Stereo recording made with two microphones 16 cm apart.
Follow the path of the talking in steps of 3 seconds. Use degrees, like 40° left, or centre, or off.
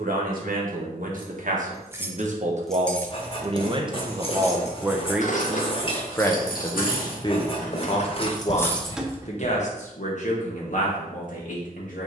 60° right, 20° right, 30° left, 50° left.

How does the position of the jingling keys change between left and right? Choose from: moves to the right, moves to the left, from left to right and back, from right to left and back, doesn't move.
from right to left and back.